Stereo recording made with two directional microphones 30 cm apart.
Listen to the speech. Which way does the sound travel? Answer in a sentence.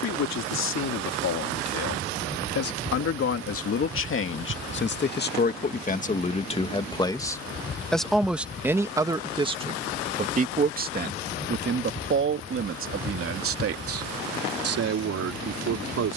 You can hear the speech move from left to right.